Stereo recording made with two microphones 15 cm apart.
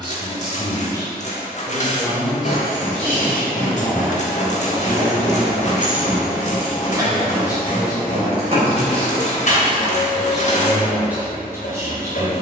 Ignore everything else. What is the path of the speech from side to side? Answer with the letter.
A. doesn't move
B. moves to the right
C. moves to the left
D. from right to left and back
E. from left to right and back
D.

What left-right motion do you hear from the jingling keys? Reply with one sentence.
In this clip you hear the jingling keys move to the right.